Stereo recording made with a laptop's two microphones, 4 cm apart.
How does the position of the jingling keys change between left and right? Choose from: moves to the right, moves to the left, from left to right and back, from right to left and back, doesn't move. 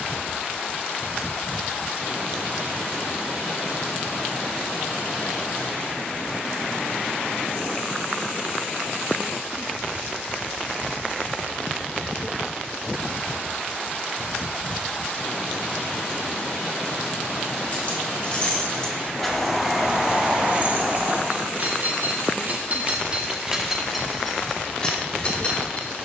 from left to right and back.